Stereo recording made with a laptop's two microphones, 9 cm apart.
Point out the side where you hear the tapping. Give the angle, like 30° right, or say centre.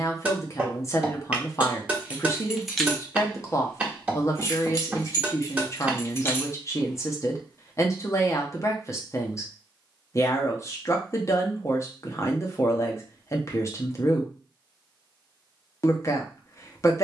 20° right.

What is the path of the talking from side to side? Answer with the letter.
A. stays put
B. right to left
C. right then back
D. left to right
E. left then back
A.